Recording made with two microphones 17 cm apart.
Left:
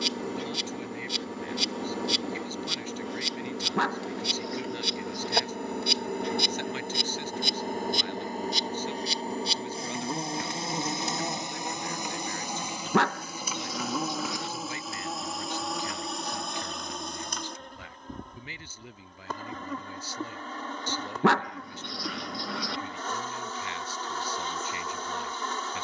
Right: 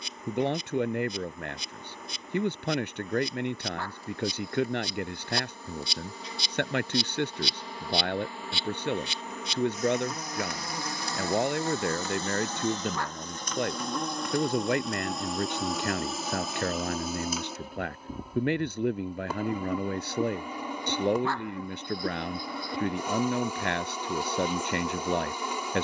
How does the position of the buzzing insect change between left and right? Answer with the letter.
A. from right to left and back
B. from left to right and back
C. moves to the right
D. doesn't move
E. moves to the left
C.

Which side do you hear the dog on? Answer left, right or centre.
left.